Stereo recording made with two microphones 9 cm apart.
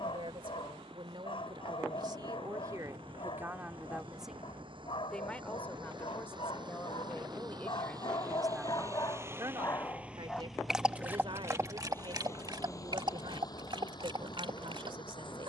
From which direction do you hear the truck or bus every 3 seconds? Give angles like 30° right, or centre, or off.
70° right, 70° right, 50° right, centre, 40° left.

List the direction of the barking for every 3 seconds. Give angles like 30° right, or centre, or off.
70° left, 70° left, 60° left, centre, 60° right.